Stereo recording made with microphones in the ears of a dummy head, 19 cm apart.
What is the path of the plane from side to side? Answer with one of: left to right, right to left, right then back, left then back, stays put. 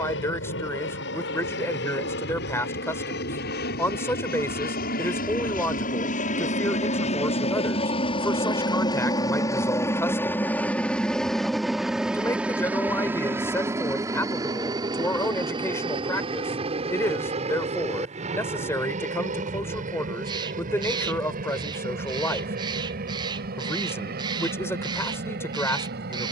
left to right.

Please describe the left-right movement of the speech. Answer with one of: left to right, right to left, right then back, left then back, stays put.
stays put.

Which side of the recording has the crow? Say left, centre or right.
right.